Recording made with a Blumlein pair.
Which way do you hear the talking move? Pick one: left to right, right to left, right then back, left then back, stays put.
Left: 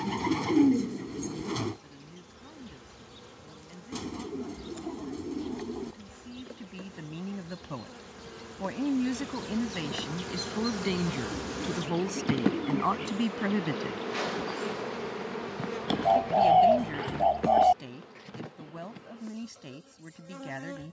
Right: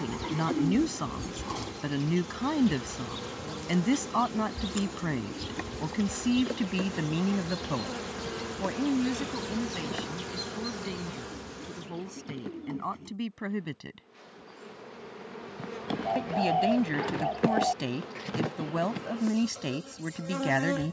left then back.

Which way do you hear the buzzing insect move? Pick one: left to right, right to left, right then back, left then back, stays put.
left then back.